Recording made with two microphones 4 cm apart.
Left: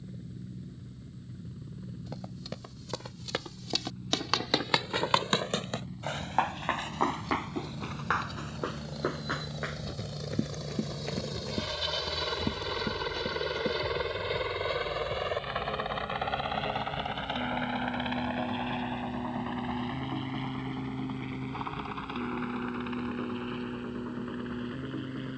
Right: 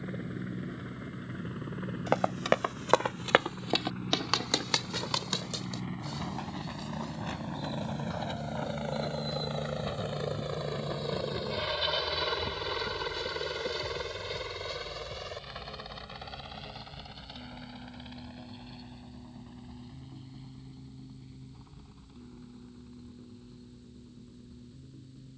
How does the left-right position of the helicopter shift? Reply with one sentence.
You can hear the helicopter move to the left.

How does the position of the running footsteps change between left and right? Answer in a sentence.
You can hear the running footsteps go from the right side to the left.